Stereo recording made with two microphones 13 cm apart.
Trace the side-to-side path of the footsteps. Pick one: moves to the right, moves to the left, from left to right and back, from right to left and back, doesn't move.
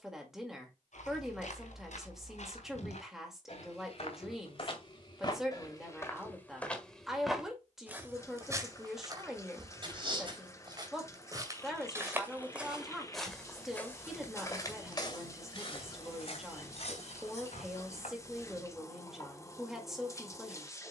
from left to right and back.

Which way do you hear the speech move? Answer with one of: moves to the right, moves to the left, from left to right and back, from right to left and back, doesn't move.
doesn't move.